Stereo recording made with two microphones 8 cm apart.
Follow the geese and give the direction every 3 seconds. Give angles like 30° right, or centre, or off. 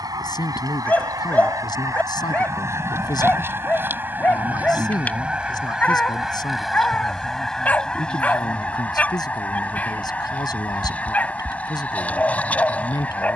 40° right, 20° right, 10° left, 20° left, 20° left.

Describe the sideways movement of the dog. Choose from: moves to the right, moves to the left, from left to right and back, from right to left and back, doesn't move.
doesn't move.